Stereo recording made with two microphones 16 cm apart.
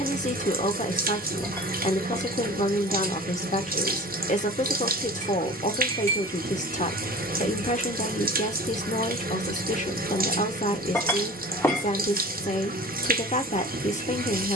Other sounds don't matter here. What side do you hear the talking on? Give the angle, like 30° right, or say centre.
50° left.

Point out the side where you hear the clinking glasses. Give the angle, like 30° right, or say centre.
20° left.